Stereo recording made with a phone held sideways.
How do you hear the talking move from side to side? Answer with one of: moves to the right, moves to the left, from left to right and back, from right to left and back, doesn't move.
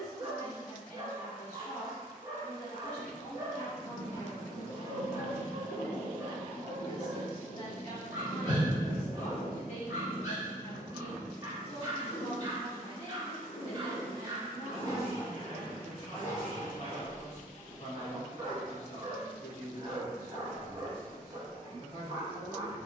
doesn't move.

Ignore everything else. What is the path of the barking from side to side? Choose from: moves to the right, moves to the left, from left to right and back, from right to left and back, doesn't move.
doesn't move.